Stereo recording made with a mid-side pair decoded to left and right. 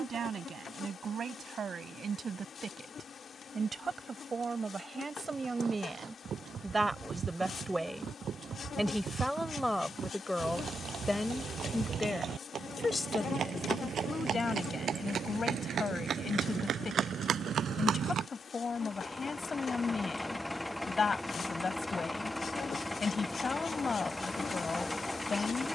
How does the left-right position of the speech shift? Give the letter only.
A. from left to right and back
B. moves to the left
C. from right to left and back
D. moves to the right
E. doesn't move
B.